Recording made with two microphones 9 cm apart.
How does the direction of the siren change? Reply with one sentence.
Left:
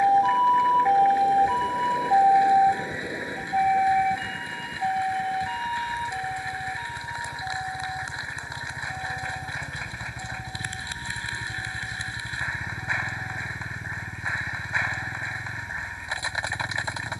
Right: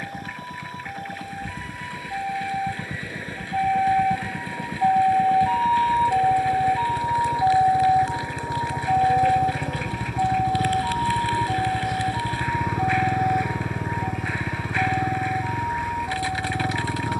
You can hear the siren move from left to right.